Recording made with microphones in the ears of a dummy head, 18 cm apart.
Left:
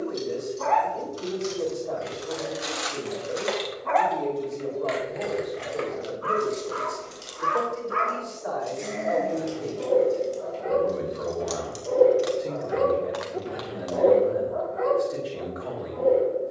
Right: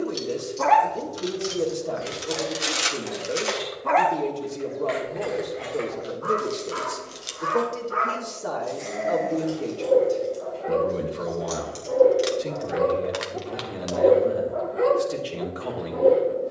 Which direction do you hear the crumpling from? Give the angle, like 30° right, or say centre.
30° right.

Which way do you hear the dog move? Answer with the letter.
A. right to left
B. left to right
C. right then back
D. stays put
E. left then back
E.